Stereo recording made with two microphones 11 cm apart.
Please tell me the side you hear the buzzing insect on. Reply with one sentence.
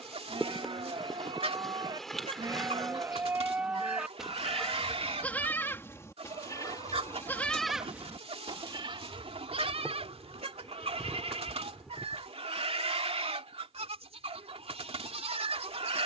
You can hear the buzzing insect in the centre.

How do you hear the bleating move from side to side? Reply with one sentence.
In this clip you hear the bleating move from right to left and back again.